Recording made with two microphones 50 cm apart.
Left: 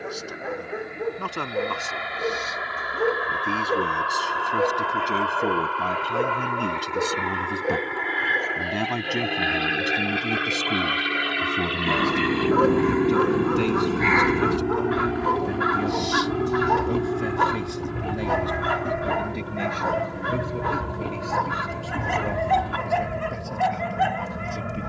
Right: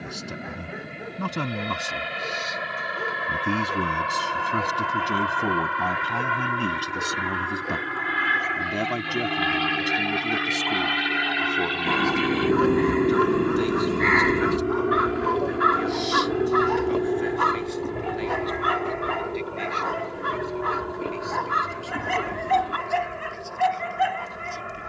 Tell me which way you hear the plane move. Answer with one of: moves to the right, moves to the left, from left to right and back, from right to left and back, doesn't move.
moves to the left.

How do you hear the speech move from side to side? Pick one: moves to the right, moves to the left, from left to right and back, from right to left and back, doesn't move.
moves to the left.